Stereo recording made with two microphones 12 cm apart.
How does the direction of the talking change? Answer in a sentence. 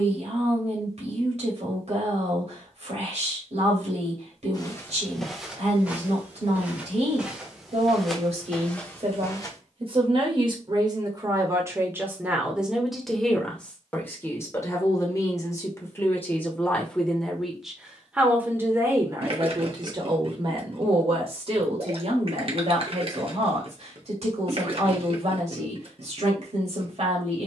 In this clip you hear the talking move from right to left and back again.